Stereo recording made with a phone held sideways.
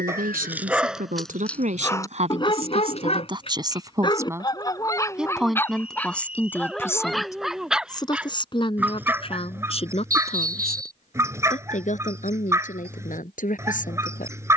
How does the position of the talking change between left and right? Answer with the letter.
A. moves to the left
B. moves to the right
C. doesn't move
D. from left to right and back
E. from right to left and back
A.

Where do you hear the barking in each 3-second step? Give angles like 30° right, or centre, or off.
10° left, 20° left, centre, 10° right, 20° right.